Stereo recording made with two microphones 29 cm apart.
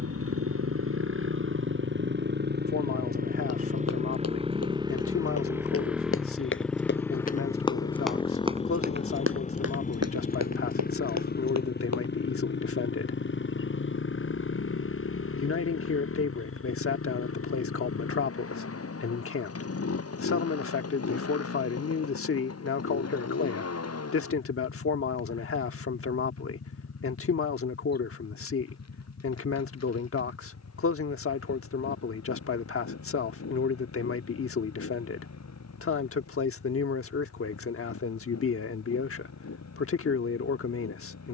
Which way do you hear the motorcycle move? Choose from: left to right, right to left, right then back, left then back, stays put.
right to left.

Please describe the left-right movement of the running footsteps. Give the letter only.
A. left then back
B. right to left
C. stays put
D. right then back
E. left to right
E.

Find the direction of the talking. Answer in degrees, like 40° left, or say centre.
50° left.